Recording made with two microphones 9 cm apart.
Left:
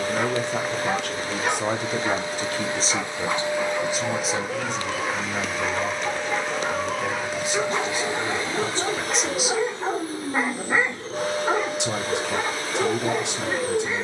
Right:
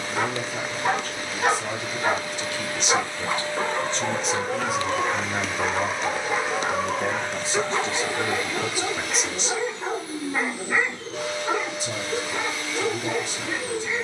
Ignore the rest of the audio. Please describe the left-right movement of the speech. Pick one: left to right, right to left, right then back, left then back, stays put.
right then back.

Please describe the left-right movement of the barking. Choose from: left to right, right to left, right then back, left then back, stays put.
right to left.